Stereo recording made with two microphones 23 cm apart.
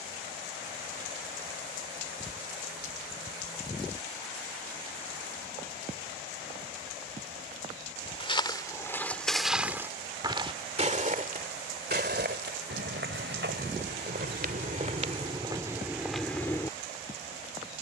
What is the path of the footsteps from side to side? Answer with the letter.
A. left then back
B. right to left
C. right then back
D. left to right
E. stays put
C.